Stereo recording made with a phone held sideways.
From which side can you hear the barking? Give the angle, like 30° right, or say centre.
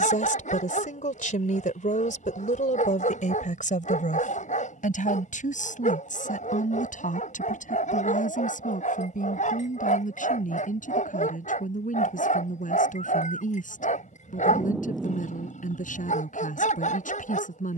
70° left.